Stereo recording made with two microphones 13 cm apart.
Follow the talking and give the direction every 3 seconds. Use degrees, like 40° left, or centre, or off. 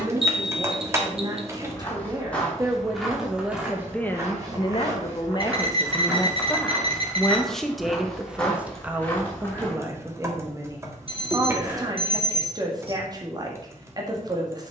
30° right, 20° left, centre, 20° right, 30° right.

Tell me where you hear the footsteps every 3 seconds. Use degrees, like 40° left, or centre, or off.
10° left, 20° right, centre, 20° left, off.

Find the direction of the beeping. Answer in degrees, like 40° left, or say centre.
50° right.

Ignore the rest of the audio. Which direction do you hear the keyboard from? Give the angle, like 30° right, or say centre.
20° right.